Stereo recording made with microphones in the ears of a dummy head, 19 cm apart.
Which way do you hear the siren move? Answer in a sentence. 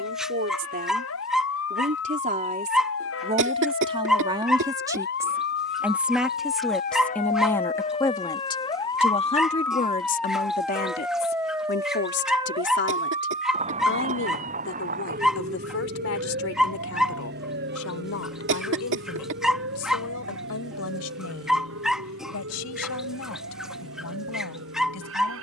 You can hear the siren move to the right.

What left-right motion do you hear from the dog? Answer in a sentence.
In this clip you hear the dog stay in one place.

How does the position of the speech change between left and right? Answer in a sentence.
You can hear the speech go from the right side to the left.